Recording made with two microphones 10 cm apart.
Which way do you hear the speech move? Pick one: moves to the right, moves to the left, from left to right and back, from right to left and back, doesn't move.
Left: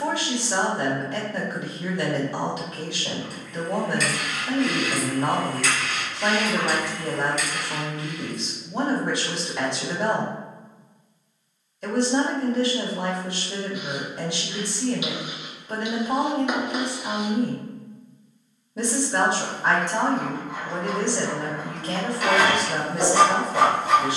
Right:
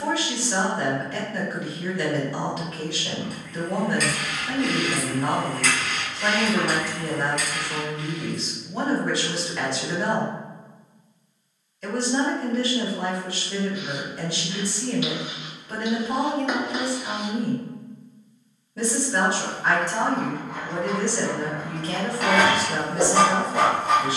doesn't move.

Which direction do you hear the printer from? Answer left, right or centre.
right.